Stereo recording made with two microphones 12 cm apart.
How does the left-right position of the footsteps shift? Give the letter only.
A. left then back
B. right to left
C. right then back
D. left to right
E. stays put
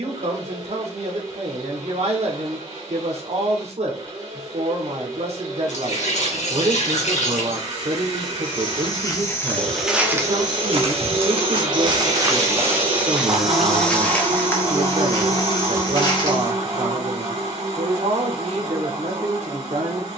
C.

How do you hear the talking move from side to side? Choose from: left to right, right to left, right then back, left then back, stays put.
stays put.